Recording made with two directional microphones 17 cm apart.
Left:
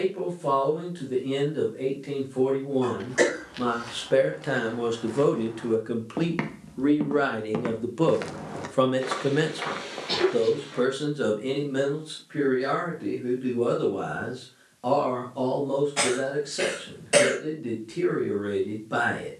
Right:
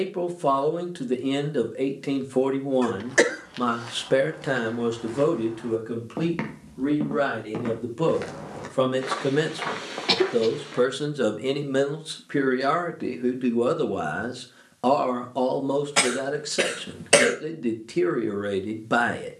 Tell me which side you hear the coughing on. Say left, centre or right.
right.